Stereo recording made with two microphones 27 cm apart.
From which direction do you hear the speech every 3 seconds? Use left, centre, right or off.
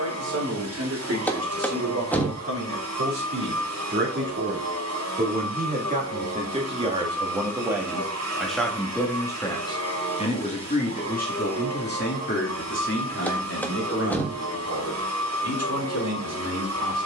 right, right, centre, left, left, left.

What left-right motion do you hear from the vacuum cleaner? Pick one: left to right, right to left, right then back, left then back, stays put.
stays put.